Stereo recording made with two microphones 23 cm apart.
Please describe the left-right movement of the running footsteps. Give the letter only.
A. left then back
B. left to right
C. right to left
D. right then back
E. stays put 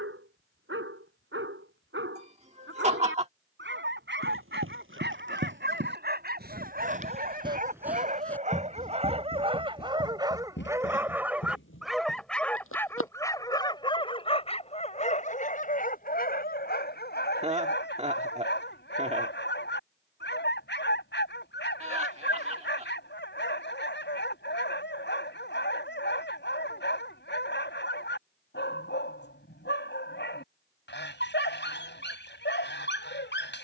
C.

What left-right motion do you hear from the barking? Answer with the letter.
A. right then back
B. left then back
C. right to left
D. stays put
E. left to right
C.